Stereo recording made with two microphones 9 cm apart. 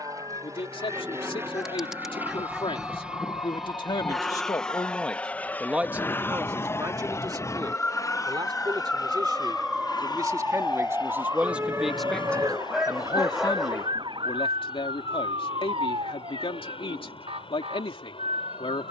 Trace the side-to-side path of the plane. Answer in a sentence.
In this clip you hear the plane go from the right side to the left.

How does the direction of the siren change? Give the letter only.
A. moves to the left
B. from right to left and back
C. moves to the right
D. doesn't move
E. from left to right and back
C.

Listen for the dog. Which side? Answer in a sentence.
You can hear the dog in the centre.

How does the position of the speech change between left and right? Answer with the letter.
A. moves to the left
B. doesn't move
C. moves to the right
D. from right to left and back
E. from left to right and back
E.